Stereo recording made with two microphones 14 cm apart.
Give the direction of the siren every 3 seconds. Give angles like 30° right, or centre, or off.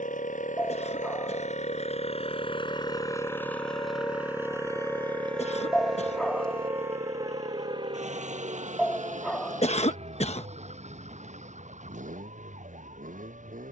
60° left, 20° left, 30° right, 50° right, 60° right.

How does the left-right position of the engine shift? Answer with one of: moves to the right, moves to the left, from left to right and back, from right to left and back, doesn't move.
moves to the right.